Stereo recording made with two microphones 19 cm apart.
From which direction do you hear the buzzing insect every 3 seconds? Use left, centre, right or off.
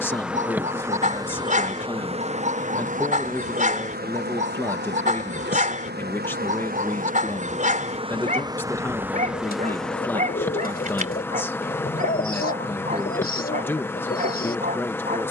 right, right, right, centre, centre.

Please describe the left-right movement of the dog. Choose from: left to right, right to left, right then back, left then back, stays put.
stays put.